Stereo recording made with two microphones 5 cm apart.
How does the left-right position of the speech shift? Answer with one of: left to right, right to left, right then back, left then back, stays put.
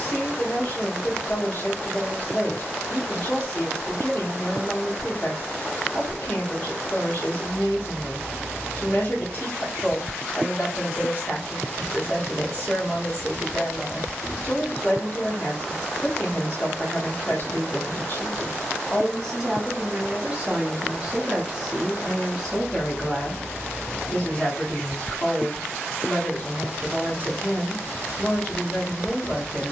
right then back.